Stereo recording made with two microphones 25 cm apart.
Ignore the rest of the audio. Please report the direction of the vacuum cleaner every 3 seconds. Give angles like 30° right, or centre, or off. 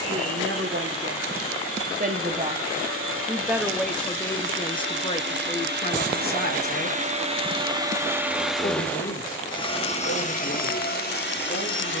70° right, 50° right, 20° right, 40° left.